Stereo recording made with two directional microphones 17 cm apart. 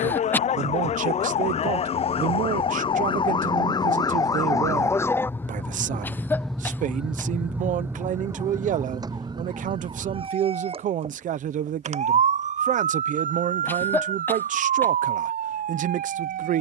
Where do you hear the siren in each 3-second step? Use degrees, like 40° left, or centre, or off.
40° left, 20° left, 10° right, 30° right, 50° right, 60° right.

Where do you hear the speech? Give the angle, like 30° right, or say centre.
50° right.